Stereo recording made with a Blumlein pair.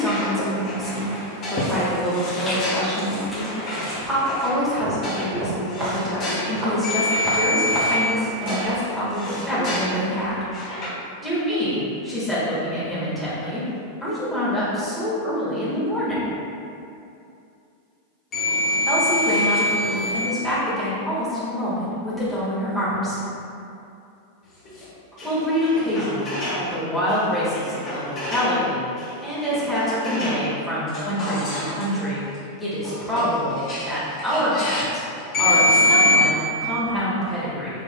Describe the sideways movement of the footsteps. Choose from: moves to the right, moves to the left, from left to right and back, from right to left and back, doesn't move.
from left to right and back.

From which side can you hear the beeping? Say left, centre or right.
left.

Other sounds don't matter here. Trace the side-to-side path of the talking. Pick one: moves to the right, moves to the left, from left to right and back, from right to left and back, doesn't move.
doesn't move.